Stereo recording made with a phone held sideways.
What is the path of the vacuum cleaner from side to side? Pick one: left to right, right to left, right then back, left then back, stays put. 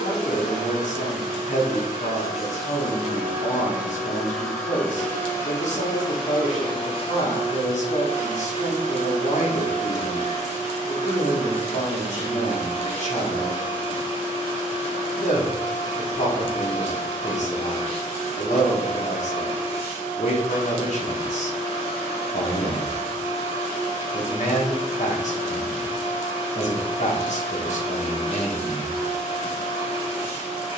right to left.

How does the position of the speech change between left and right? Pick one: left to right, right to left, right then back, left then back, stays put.
stays put.